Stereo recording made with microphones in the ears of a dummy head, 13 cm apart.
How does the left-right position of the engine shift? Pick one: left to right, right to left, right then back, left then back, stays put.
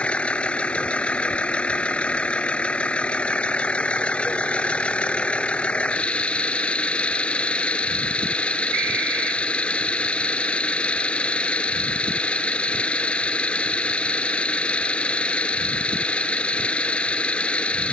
stays put.